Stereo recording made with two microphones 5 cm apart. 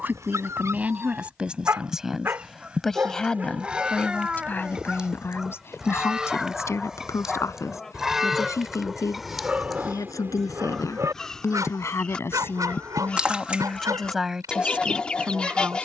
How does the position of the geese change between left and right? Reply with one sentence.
You can hear the geese move to the left.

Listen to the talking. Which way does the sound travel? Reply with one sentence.
In this clip you hear the talking go left and come back.